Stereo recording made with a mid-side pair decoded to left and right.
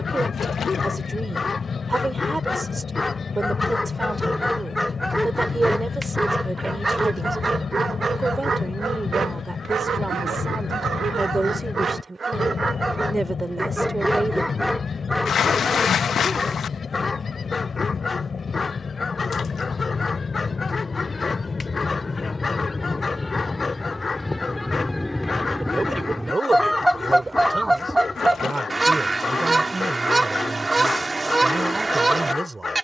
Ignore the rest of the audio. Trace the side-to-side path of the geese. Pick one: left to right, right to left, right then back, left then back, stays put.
left to right.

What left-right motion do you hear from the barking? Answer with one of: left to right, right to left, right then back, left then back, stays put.
right then back.